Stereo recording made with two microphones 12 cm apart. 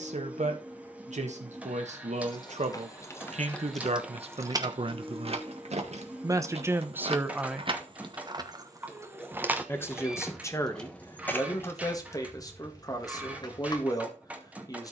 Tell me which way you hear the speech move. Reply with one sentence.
You can hear the speech travel towards the left.